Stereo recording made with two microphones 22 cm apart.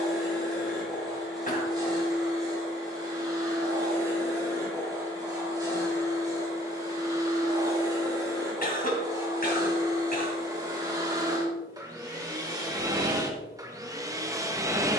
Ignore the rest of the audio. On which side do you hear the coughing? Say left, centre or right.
left.